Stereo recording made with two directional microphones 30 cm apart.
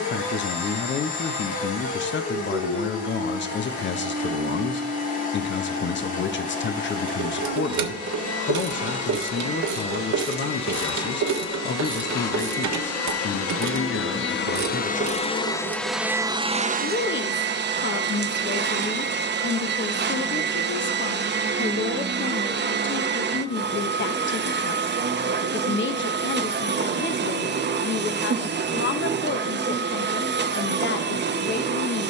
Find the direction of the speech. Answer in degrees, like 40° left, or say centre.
40° left.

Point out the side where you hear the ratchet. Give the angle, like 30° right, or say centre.
70° right.